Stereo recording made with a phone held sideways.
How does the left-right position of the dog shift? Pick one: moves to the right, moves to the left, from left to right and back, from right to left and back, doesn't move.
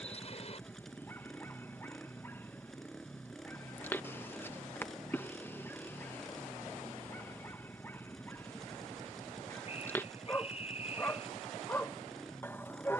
doesn't move.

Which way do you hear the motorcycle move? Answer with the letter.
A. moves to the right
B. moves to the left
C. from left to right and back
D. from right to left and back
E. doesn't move
E.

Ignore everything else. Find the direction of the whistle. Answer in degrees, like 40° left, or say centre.
50° left.